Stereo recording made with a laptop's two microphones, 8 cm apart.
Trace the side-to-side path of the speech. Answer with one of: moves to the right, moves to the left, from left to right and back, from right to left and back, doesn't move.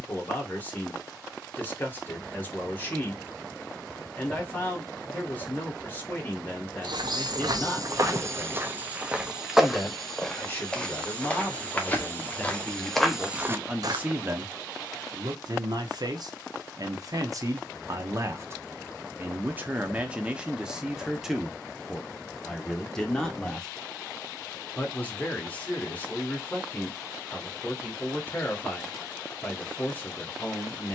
from left to right and back.